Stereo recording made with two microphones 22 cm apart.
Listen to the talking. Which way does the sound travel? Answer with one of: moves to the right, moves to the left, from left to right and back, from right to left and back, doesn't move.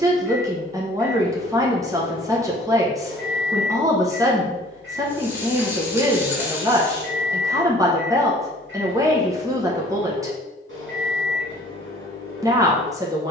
doesn't move.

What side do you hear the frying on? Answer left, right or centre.
centre.